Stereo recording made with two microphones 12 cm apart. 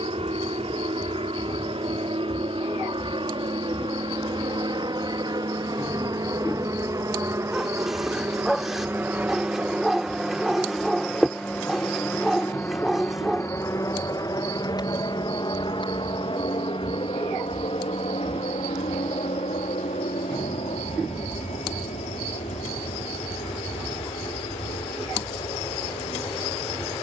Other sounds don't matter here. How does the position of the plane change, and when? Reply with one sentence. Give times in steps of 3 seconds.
In this clip you hear the plane on the right from 0 s, in the centre from 9 s and on the left from 12 s.